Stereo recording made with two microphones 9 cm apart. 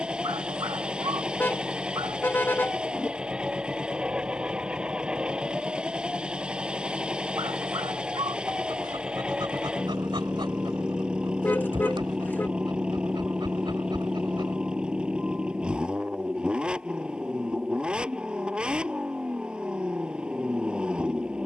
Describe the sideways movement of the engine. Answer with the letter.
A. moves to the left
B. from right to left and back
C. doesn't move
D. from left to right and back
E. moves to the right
C.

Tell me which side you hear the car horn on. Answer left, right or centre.
left.